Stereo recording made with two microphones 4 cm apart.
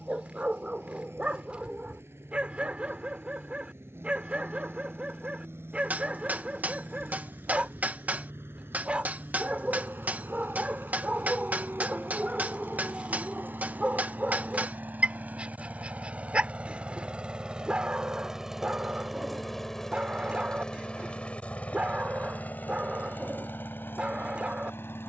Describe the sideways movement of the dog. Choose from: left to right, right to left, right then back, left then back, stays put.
stays put.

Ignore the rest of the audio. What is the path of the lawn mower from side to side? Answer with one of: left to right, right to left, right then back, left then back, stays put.
right to left.